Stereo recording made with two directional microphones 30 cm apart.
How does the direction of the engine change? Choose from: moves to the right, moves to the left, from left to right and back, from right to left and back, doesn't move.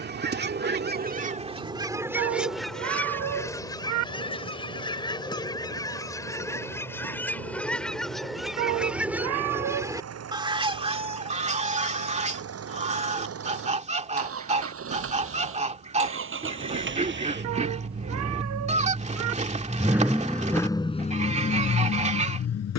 moves to the left.